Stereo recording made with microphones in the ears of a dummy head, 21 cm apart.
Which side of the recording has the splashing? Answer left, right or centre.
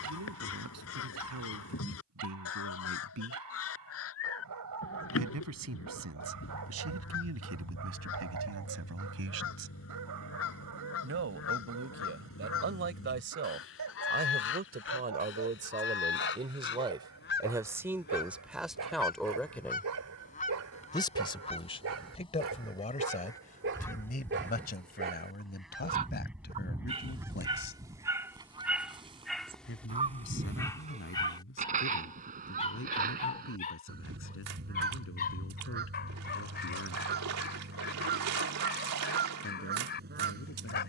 right.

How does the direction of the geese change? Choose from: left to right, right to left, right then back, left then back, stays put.
left to right.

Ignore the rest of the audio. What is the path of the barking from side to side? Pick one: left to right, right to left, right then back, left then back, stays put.
right to left.